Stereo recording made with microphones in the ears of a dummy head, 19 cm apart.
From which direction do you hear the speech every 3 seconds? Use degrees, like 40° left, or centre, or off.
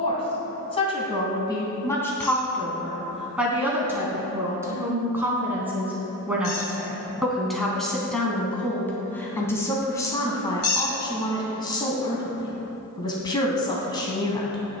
20° left, 10° right, centre, 20° left, 20° left.